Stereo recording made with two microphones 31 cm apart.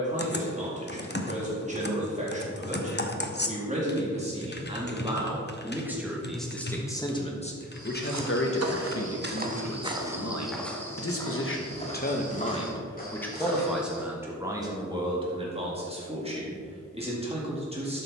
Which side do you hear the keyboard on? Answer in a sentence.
In this clip you hear the keyboard on the left.